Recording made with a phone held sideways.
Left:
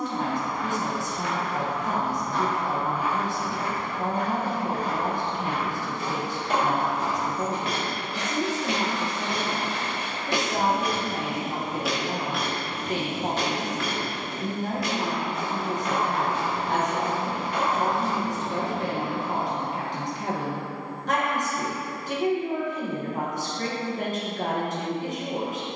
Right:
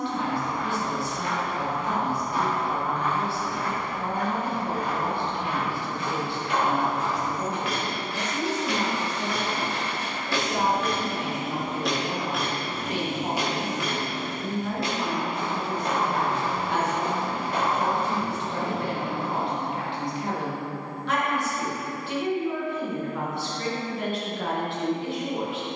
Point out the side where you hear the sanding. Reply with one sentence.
In this clip you hear the sanding on the right.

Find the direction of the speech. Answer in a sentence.
In this clip you hear the speech on the left.